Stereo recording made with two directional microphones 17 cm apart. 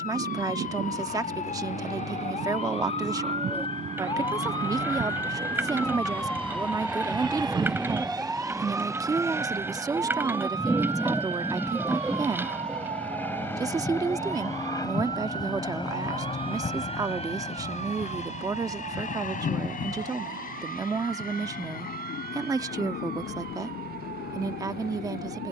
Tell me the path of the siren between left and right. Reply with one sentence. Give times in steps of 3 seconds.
In this clip you hear the siren on the left from 0 s, in the centre from 6 s and on the right from 9 s.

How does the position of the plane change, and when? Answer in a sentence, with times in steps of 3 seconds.
You can hear the plane on the right from 0 s, in the centre from 9 s and on the left from 15 s.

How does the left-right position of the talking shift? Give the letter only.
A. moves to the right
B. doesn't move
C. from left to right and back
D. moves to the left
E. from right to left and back
B.